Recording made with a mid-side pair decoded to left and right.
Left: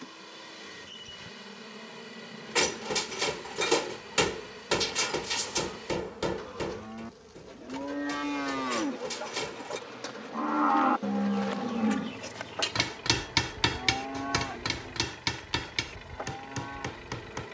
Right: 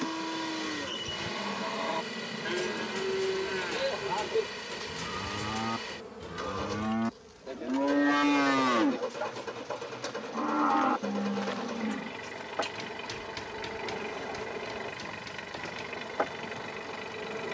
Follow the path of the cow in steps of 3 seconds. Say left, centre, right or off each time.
right, right, right, centre, left, left.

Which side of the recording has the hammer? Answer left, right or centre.
left.